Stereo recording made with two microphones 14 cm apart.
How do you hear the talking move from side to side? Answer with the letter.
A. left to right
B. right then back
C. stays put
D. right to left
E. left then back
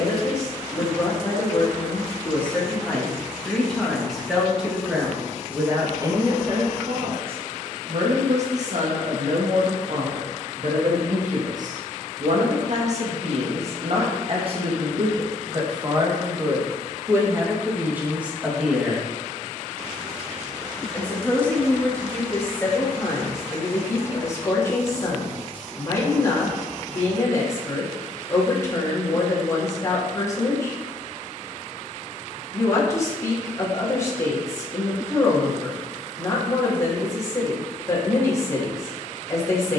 B.